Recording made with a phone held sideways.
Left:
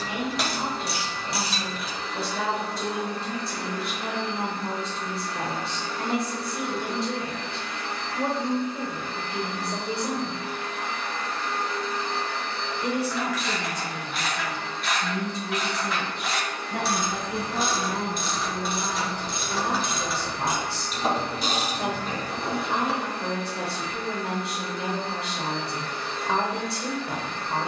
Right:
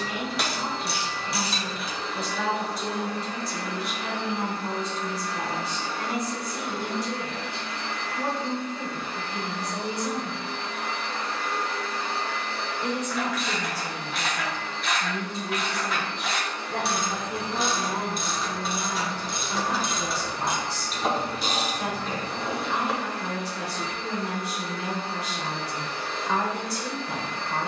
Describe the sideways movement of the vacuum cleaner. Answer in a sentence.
You can hear the vacuum cleaner stay in one place.